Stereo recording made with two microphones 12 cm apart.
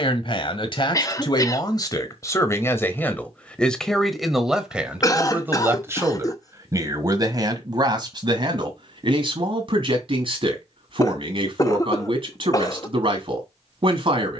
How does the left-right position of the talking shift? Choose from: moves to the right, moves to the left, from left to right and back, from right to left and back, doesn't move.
moves to the right.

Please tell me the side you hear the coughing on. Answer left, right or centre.
left.